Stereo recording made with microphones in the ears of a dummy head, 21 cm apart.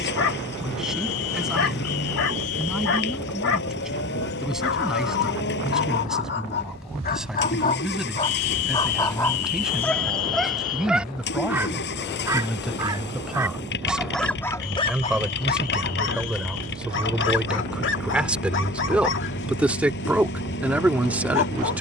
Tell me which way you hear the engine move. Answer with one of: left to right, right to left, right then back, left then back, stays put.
stays put.